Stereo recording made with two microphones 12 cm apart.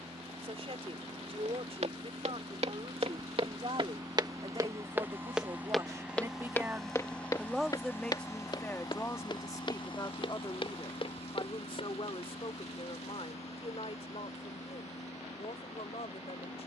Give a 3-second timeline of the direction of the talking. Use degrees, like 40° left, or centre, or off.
60° right, 40° right, centre, 40° left, 60° left, 60° left.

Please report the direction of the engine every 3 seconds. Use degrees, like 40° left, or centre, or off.
50° right, 30° right, 10° left, 50° left, 70° left, 80° left.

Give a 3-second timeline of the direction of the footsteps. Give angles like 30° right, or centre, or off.
70° right, 30° right, 30° left, 50° left, off, off.